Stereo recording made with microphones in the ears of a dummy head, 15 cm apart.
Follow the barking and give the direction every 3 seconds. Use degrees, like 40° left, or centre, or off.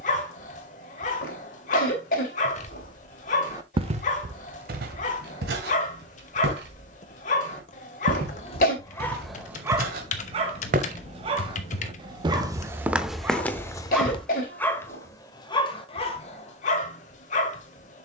50° left, 50° left, 40° left, 20° right, 10° right, 40° left.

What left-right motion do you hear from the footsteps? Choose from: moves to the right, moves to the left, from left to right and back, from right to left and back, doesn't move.
from left to right and back.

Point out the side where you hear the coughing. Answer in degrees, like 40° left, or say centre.
50° left.